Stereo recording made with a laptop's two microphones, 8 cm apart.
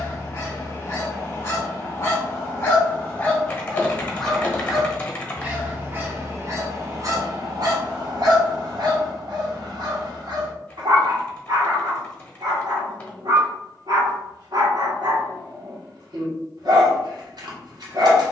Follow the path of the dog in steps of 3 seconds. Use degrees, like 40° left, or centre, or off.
30° left, centre, 50° right, 60° right, 60° right, 60° right.